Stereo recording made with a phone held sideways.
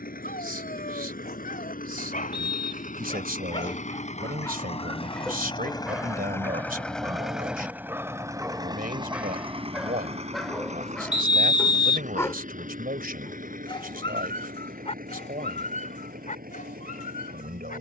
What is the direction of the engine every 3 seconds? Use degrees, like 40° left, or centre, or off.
70° left, 40° left, 10° right, 40° right, 60° right, 70° right.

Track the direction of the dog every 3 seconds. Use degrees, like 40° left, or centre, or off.
70° left, 20° left, 10° right, centre, 30° left, 60° left.